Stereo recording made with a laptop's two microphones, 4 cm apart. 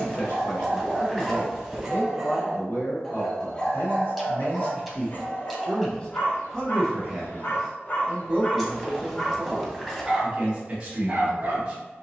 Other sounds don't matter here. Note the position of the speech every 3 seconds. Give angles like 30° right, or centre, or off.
60° left, 40° left, 10° right, 30° right.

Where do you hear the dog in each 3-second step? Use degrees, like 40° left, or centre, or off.
20° right, 30° left, 40° left, 10° right.